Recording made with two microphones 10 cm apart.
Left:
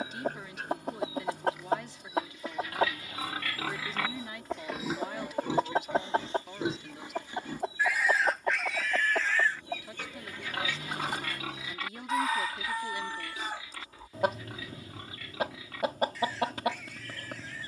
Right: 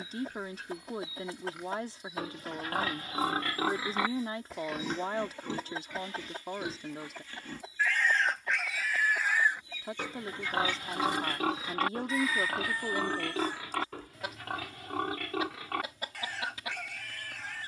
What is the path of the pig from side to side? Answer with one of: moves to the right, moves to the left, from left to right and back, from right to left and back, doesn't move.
from right to left and back.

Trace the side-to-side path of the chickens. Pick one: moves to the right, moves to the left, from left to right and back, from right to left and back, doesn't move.
doesn't move.